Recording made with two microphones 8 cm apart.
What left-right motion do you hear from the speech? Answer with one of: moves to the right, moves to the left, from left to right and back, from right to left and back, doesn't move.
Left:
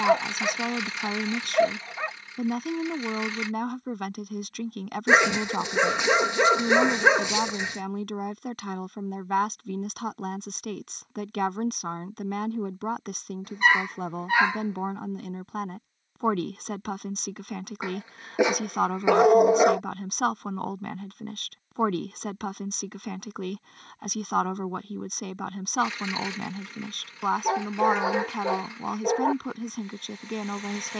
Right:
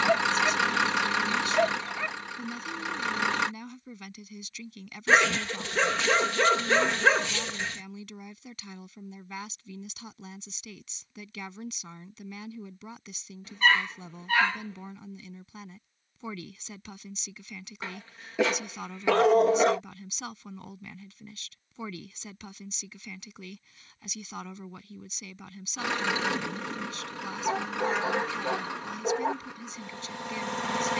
doesn't move.